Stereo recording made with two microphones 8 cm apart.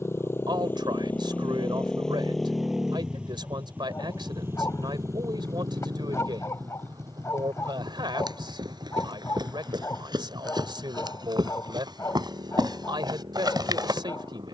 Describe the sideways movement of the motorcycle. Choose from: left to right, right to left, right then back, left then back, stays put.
left to right.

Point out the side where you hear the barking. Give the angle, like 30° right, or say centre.
40° left.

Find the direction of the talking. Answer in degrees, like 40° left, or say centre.
80° right.